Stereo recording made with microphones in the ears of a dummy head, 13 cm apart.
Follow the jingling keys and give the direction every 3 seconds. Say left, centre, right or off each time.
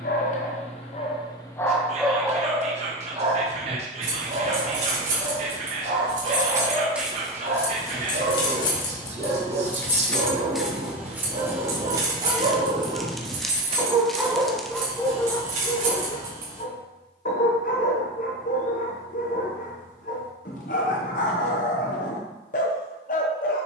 off, right, centre, centre, right, right, off, off.